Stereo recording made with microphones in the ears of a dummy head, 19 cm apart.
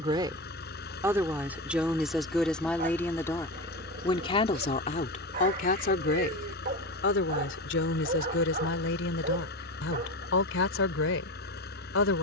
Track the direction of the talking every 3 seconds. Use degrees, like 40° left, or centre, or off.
10° right, 30° left, 60° left, 60° left.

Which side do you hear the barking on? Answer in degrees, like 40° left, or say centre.
40° right.